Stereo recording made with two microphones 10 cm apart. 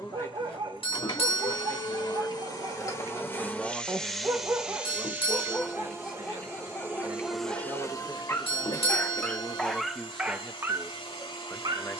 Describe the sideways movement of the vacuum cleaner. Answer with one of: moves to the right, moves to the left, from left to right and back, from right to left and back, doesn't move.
from left to right and back.